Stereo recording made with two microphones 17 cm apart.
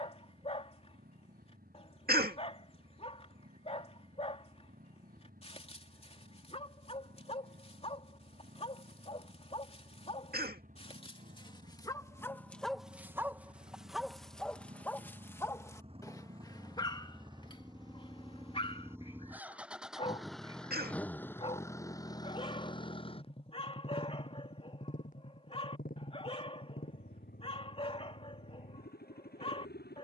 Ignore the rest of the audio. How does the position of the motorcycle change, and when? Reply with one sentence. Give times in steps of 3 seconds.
You can hear the motorcycle on the right from 0 s, in the centre from 18 s and on the left from 21 s.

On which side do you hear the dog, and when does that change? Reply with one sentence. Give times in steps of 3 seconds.
In this clip you hear the dog on the left from 0 s, in the centre from 12 s and on the left from 15 s.